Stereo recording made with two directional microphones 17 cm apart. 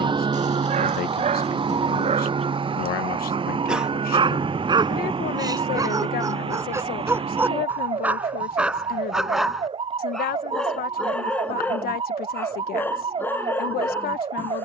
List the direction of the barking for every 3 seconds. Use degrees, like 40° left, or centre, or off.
40° right, 30° right, 10° right, centre, 10° left.